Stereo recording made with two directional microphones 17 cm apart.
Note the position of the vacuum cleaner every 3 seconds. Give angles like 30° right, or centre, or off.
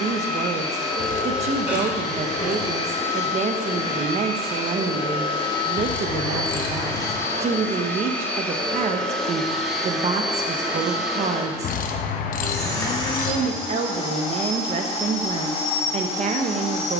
40° left, 30° left, 20° left, centre, 30° left, 40° left.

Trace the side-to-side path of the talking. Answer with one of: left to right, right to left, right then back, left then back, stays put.
stays put.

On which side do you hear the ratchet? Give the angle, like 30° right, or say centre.
60° left.